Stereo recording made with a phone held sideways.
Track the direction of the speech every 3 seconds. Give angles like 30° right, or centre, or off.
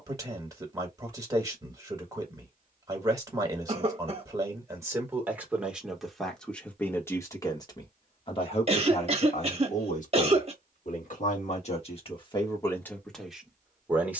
20° right, 20° right, 20° left, 50° left, 10° left.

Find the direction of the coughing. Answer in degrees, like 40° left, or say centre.
40° right.